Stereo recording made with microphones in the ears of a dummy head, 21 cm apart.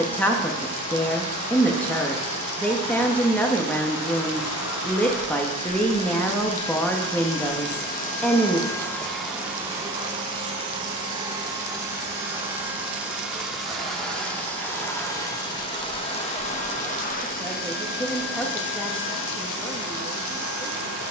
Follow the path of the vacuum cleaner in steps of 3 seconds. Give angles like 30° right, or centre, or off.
70° left, 70° left, 50° left, 10° right, centre, 30° left, 60° left.